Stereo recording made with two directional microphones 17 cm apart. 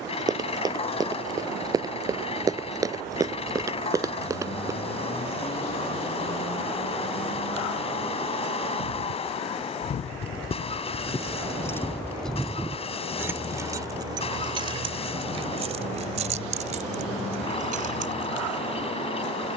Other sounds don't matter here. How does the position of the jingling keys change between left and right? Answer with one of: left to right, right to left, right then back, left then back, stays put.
left to right.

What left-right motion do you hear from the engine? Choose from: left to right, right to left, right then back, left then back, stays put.
stays put.